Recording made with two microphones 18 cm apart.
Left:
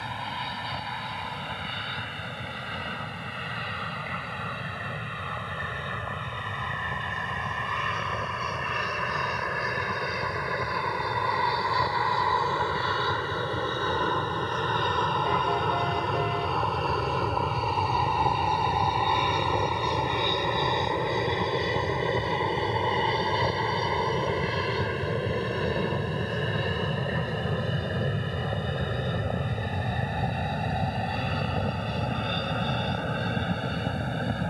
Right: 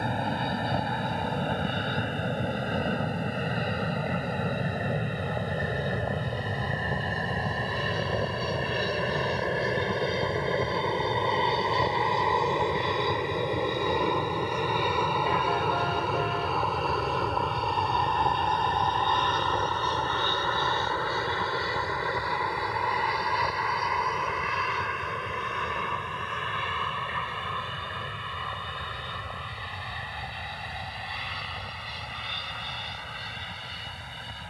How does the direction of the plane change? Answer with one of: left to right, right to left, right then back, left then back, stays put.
right to left.